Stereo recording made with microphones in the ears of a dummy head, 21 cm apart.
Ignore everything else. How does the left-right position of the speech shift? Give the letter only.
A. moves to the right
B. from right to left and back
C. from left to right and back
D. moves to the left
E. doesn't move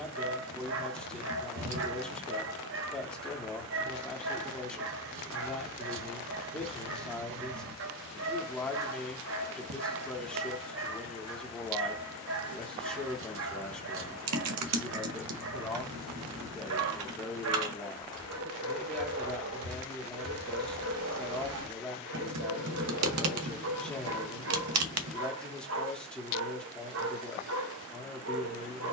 E.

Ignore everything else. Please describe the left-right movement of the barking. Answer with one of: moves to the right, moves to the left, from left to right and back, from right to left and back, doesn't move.
doesn't move.